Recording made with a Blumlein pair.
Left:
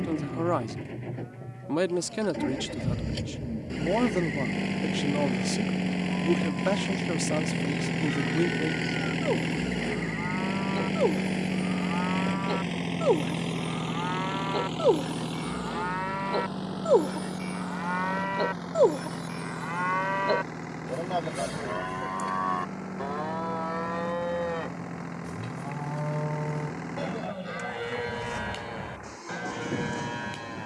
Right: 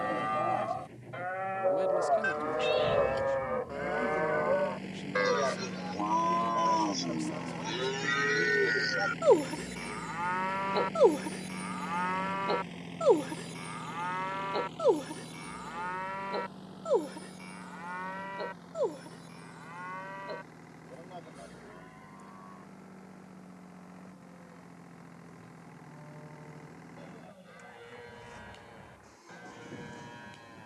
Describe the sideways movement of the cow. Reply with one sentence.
You can hear the cow go from the right side to the left.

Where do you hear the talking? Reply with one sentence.
You can hear the talking on the left.